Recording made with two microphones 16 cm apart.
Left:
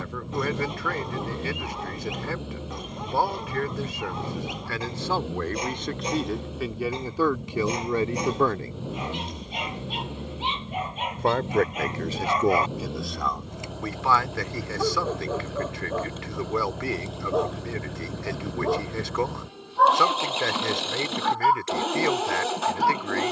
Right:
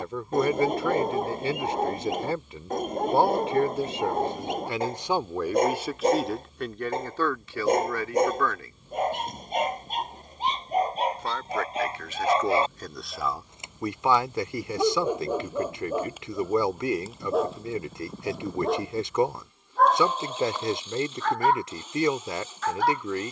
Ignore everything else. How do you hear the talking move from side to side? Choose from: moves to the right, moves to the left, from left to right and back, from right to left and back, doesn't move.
from right to left and back.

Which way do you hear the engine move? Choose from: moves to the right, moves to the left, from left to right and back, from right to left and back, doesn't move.
doesn't move.